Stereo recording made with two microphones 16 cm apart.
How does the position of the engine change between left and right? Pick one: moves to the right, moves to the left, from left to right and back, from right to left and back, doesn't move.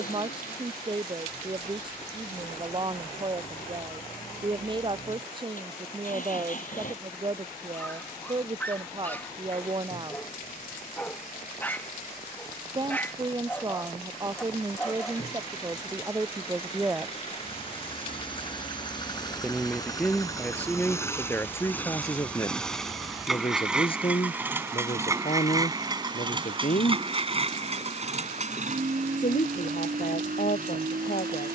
moves to the right.